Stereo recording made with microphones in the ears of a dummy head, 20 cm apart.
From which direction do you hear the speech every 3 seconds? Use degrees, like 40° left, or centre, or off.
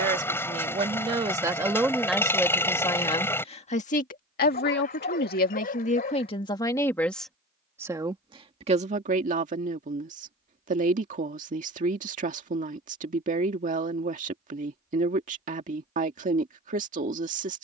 10° right, 40° left, centre, 30° right, 30° right, 30° right.